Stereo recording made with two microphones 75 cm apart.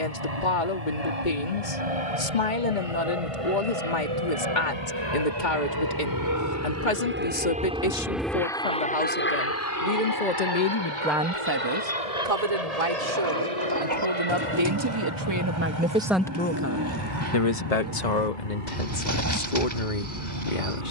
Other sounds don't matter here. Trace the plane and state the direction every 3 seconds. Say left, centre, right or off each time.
right, right, centre, left, left, left, left.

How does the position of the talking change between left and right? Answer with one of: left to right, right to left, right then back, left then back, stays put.
right then back.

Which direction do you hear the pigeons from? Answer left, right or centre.
right.